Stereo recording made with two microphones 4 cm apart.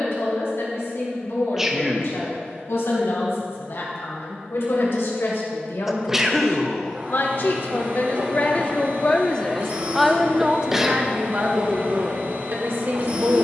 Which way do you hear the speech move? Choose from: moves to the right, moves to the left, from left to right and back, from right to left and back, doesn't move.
moves to the right.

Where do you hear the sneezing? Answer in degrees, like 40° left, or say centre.
10° right.